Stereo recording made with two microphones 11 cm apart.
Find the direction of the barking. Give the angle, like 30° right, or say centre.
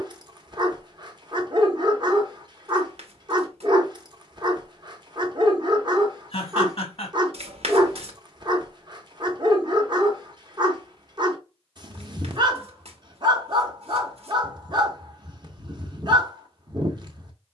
40° right.